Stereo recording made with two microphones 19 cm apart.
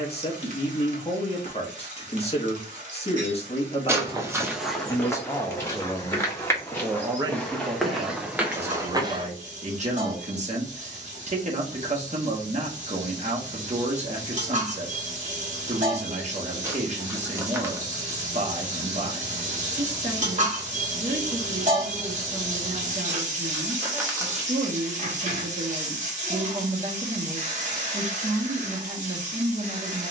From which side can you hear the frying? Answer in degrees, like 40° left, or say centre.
40° right.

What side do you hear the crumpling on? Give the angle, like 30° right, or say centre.
10° right.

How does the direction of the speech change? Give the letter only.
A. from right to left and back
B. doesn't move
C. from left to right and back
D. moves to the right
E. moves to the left
D.